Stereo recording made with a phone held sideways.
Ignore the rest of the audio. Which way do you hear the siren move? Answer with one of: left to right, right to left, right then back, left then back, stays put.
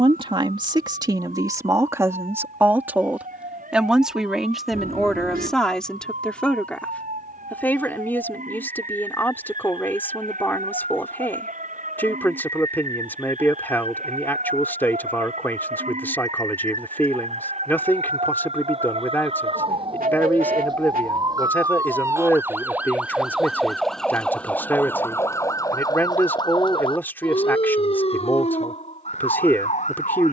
right to left.